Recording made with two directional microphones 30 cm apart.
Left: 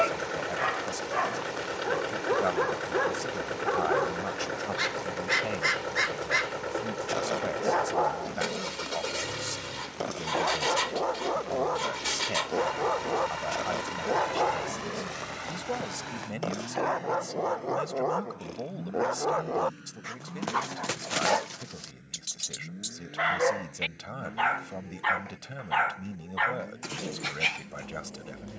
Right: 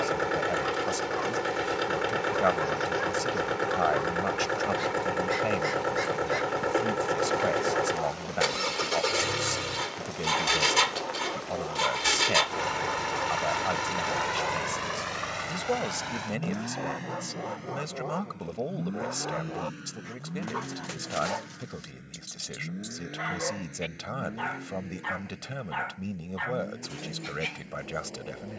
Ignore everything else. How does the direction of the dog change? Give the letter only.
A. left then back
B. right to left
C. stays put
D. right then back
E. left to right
C.